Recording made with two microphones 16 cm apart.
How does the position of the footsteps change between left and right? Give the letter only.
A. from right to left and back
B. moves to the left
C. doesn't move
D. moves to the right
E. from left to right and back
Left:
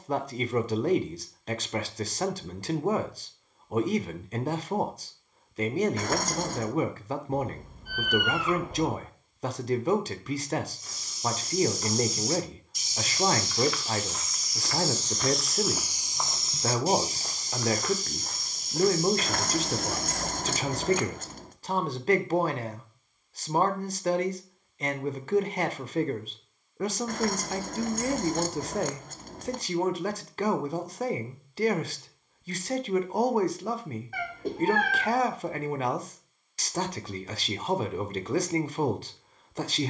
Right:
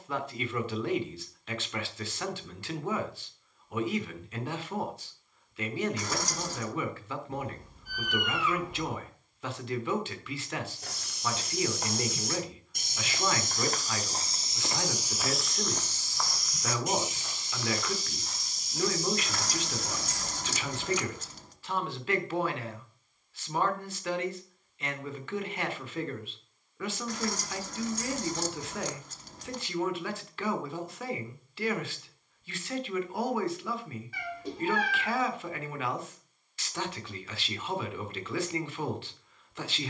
B.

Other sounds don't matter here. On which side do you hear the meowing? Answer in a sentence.
In this clip you hear the meowing on the left.